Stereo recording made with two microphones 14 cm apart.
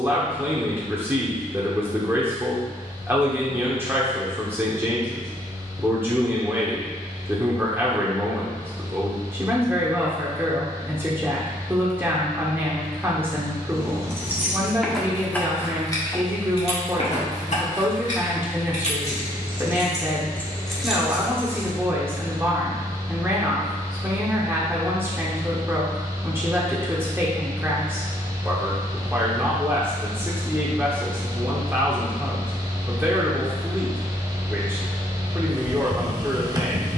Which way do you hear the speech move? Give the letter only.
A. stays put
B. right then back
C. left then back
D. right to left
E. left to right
A.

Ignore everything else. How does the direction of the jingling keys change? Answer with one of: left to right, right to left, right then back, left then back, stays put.
left then back.